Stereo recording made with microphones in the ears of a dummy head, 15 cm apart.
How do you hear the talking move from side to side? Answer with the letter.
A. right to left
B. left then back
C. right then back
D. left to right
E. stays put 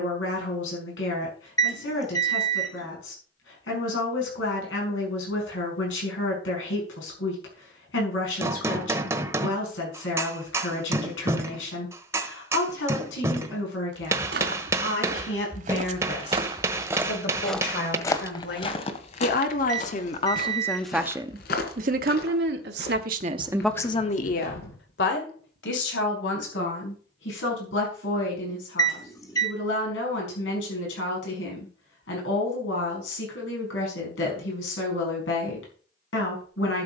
C.